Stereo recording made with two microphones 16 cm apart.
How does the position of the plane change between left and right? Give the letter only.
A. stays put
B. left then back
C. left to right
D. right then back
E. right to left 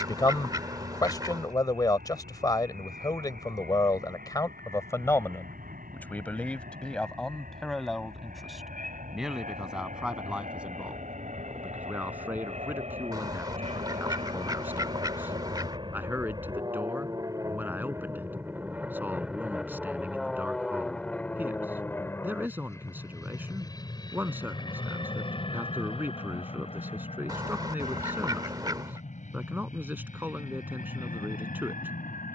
E.